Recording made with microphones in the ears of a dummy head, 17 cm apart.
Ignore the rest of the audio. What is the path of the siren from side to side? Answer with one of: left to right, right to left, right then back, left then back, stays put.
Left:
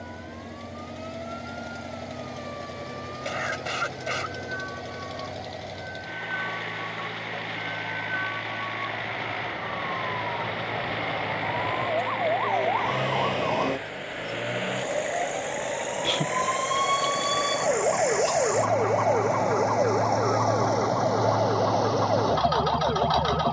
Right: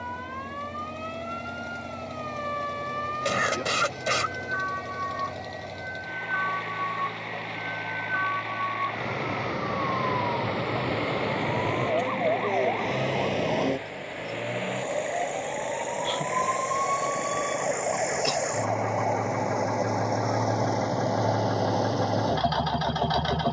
right to left.